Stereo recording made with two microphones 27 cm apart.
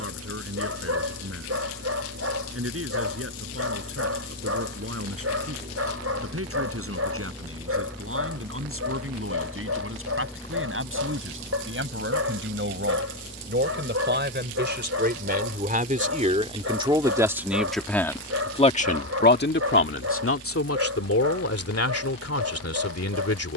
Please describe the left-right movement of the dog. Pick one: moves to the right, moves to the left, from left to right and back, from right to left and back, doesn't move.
doesn't move.